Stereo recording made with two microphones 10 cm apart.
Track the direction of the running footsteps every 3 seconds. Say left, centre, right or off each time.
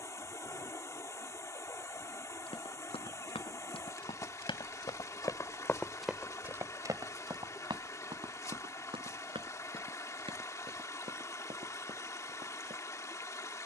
left, left, right, right, right.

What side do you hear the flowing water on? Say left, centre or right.
left.